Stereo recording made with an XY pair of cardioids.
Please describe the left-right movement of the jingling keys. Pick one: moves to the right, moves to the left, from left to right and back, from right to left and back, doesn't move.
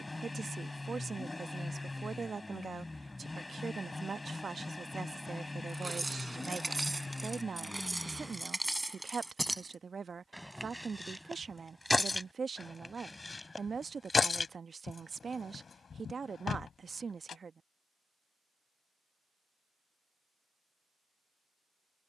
moves to the left.